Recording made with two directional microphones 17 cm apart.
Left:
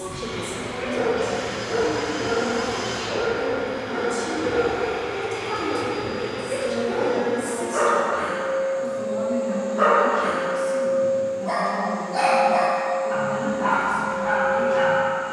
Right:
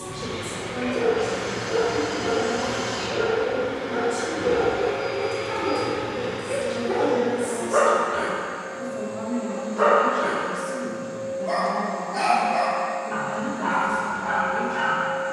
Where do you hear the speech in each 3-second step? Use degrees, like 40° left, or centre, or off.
20° left, 20° left, 10° left, 10° right, 10° left.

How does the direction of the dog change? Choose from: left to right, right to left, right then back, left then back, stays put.
right then back.